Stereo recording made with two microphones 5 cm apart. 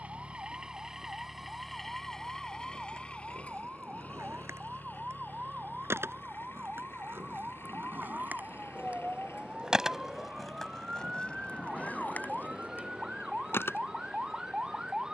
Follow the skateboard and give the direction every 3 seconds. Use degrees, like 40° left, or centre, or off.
70° right, 70° right, 50° right, 10° left, 40° left.